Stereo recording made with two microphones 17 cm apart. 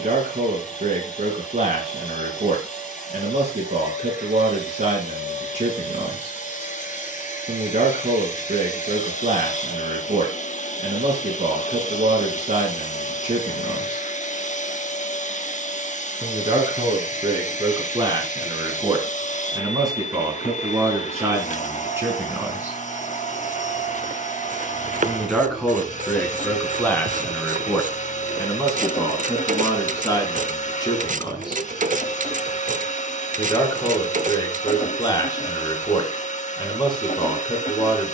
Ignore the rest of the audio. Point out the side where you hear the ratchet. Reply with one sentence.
You can hear the ratchet on the right.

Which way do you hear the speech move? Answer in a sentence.
You can hear the speech travel towards the left.